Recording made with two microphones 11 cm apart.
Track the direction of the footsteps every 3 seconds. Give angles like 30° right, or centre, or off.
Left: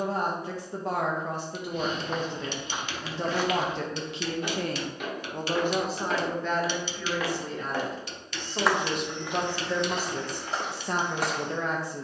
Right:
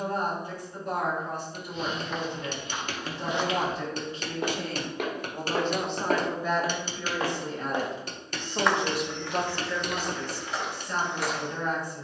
30° left, 40° right, 20° right, 30° left.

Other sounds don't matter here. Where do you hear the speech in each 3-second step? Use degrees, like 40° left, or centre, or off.
80° left, 50° left, 20° right, 50° left.